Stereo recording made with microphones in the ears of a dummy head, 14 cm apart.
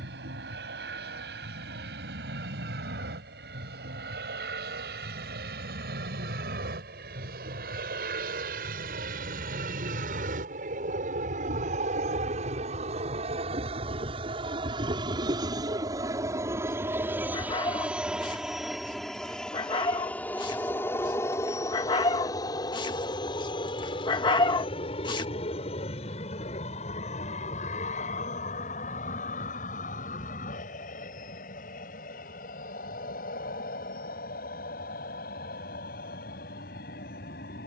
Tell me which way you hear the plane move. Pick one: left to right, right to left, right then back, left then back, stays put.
right to left.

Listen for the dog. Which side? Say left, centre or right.
left.